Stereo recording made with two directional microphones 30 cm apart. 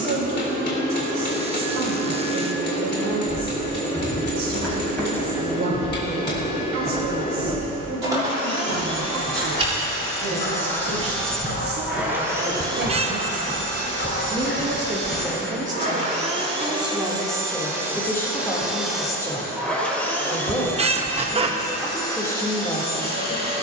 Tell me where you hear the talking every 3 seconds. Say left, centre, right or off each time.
right, right, right, right, right, centre, centre, centre.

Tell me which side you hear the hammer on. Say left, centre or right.
left.